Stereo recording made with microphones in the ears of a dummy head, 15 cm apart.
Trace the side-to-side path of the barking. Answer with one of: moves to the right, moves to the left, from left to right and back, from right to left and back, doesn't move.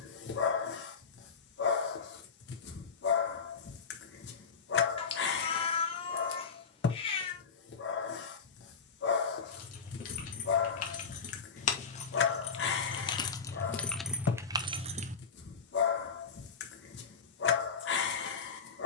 doesn't move.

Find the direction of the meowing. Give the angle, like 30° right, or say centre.
30° left.